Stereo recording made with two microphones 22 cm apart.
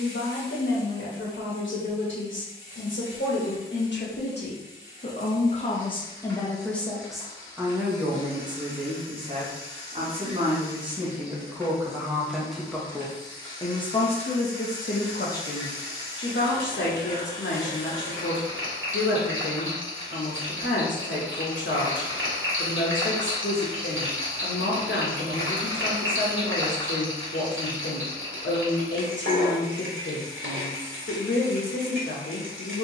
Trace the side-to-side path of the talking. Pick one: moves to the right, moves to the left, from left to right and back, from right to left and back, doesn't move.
from left to right and back.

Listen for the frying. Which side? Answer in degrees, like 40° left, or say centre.
80° right.